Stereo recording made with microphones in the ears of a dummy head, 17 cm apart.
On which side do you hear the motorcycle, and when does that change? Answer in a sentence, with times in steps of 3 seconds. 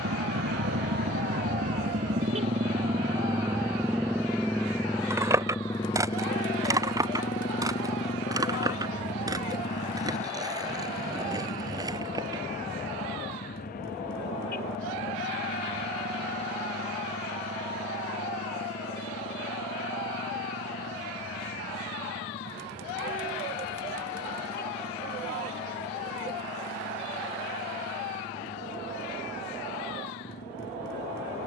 You can hear the motorcycle on the right from 0 s, in the centre from 3 s and on the left from 6 s.